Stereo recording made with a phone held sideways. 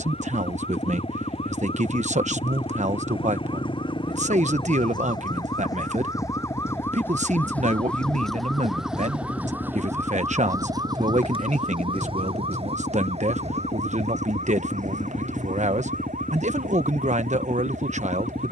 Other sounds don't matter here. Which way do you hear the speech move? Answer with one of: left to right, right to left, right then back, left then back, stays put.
stays put.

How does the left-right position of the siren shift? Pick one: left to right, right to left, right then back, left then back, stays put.
left to right.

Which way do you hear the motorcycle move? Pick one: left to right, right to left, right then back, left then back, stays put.
stays put.